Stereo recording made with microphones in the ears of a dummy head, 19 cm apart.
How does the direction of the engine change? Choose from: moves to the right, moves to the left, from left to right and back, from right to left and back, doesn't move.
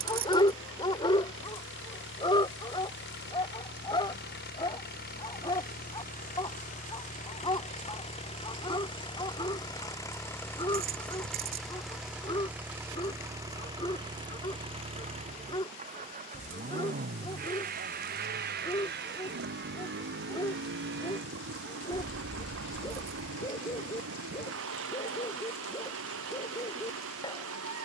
moves to the right.